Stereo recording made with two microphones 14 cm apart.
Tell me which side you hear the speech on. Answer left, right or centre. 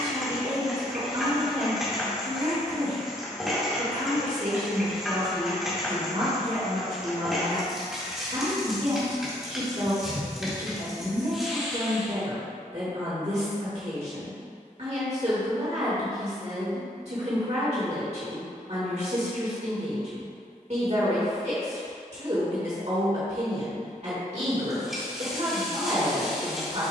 right.